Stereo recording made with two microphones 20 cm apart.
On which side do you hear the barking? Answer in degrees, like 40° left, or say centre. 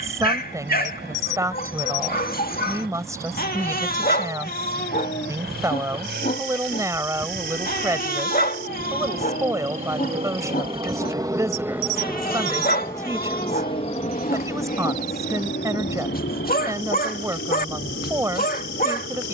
50° left.